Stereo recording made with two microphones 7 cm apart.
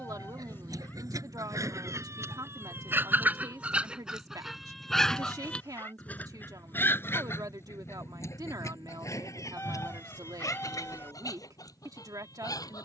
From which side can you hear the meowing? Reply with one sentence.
You can hear the meowing on the left.